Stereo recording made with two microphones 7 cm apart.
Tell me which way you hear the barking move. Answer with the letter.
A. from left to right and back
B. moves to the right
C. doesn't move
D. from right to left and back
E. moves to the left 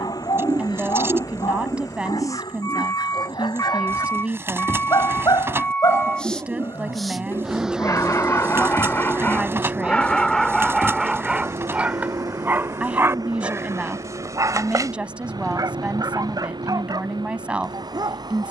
B.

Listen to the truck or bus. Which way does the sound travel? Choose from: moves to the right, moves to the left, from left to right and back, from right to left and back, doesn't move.
moves to the right.